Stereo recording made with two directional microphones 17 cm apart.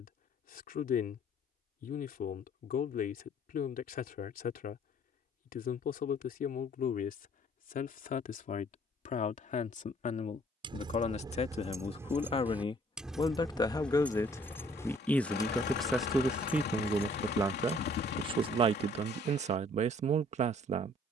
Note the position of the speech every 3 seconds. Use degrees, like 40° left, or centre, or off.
50° left, 50° left, 50° left, 40° left, 20° left, 10° right, 40° right.